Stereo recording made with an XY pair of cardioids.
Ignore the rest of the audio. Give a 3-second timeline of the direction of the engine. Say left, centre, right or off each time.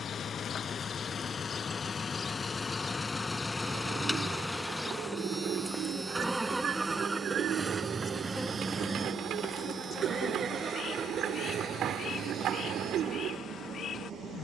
left, centre, right, right, right.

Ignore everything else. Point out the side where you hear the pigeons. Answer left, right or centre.
right.